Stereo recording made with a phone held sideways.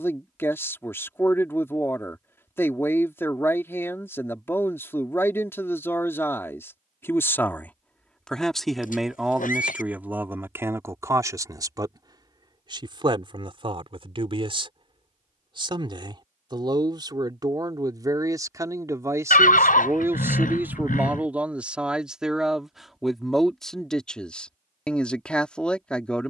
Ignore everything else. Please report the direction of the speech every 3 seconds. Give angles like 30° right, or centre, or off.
20° left, 20° left, 10° left, 20° right, 40° right, 30° right, 20° right, centre, 10° left.